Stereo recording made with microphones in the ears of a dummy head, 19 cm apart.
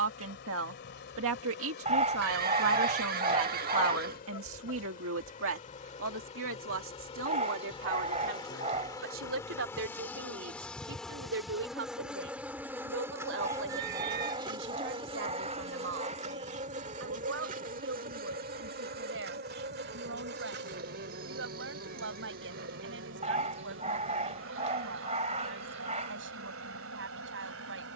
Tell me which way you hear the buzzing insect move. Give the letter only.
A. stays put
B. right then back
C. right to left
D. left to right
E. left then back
D.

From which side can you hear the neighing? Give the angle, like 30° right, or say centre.
40° right.